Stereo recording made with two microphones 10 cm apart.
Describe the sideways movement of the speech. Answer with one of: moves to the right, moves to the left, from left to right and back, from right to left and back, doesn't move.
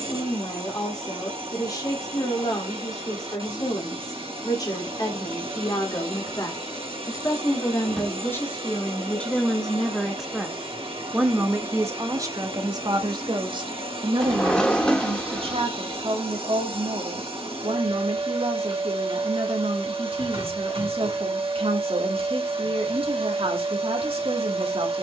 moves to the right.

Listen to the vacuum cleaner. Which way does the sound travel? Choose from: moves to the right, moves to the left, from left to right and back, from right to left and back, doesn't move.
doesn't move.